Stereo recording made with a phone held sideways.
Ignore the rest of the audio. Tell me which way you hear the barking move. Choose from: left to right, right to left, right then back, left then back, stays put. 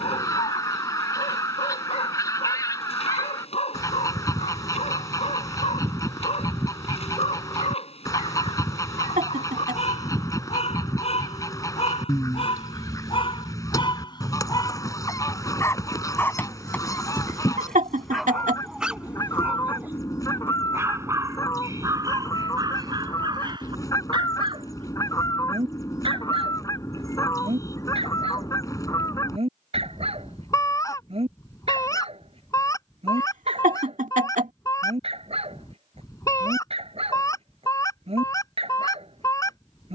left to right.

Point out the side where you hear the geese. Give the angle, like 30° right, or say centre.
20° left.